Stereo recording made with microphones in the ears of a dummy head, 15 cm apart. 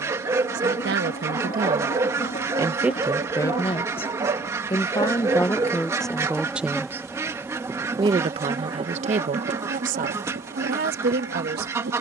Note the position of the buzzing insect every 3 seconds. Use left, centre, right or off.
left, left, centre, right.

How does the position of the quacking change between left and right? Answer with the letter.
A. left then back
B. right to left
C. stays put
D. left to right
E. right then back
C.